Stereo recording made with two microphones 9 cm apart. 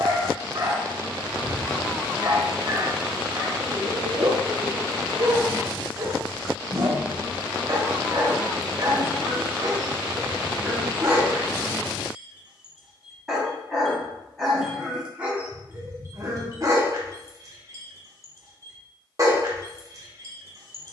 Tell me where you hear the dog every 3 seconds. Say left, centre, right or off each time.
right, right, right, right, centre, right, right.